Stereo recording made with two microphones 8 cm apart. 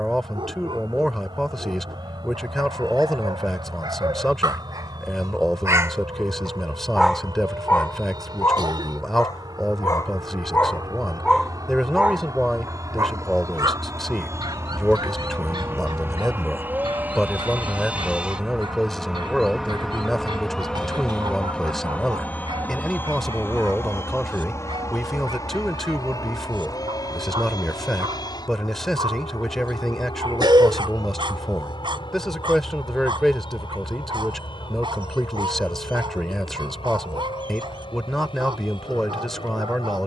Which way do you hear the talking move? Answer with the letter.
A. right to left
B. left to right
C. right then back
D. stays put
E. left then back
D.